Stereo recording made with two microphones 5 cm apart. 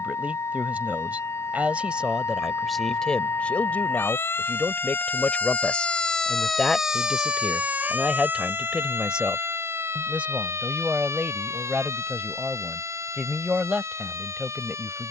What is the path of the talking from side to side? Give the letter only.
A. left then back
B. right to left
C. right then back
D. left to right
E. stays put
A.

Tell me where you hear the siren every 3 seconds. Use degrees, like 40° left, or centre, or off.
70° left, 50° left, 20° right, 60° right, 80° right.